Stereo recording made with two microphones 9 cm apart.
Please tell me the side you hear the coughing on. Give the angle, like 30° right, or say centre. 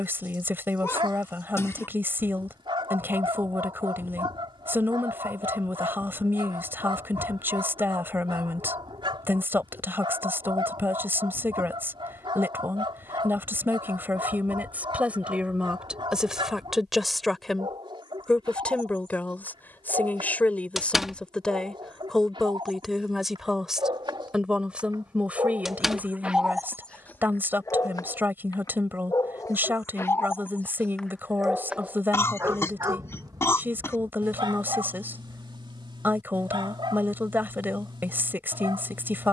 30° left.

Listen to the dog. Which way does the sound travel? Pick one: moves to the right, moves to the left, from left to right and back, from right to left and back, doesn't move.
from right to left and back.